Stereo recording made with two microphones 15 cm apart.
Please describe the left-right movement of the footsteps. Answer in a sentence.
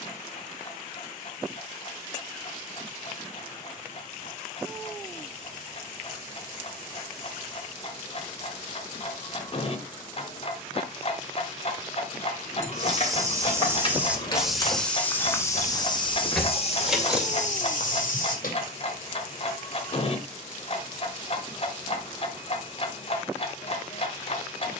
You can hear the footsteps move to the left.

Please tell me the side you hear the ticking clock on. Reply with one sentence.
In this clip you hear the ticking clock on the left.